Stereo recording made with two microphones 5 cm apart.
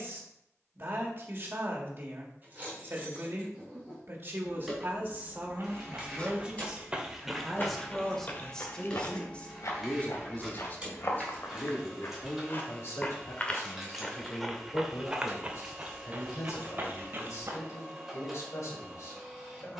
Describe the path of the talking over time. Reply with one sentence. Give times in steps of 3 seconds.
In this clip you hear the talking on the right from 0 s, in the centre from 6 s and on the left from 9 s.